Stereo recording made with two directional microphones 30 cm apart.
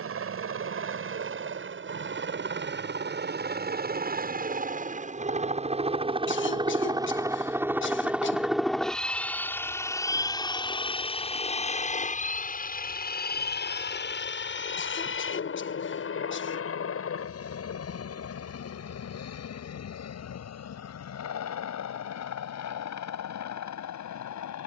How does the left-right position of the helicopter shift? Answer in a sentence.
In this clip you hear the helicopter move to the left.